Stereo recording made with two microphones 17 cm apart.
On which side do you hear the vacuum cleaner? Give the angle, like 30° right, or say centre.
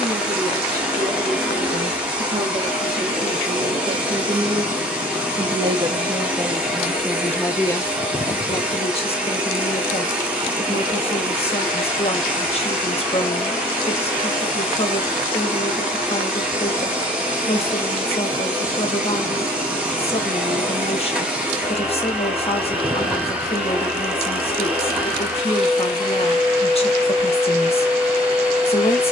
10° right.